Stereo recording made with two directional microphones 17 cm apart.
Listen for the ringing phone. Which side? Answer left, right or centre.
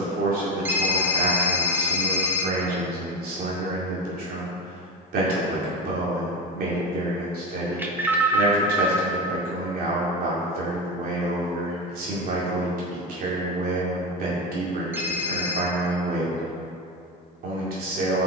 centre.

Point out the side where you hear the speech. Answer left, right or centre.
right.